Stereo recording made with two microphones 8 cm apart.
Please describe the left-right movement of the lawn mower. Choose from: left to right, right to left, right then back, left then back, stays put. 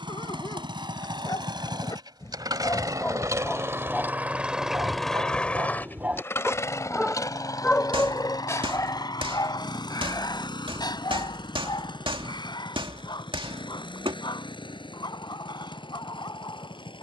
right to left.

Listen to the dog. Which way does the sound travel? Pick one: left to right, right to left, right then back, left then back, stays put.
right then back.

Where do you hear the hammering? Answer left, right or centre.
right.